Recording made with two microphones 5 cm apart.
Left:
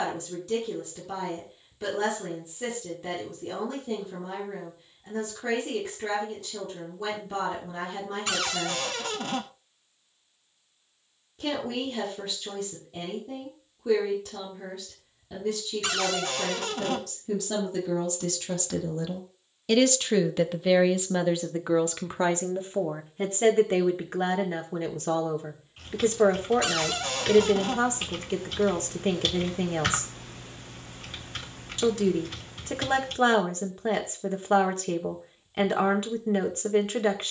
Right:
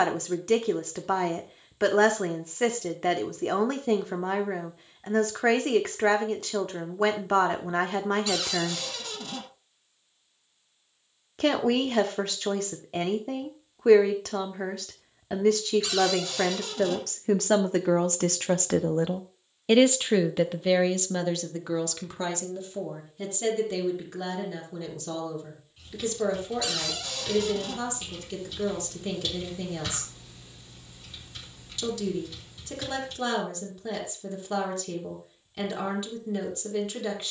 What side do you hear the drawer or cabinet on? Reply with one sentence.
In this clip you hear the drawer or cabinet on the left.